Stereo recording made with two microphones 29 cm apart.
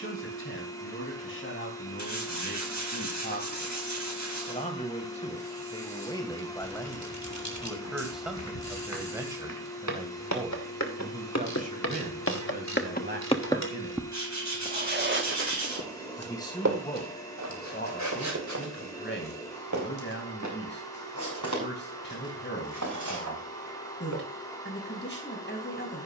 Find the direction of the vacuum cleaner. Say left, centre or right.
centre.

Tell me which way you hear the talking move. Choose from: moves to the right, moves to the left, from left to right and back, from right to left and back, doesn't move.
from left to right and back.